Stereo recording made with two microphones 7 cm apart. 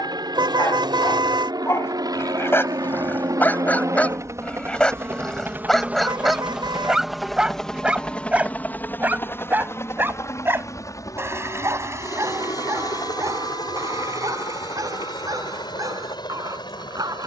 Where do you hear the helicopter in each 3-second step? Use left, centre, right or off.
right, right, centre, left, left, left.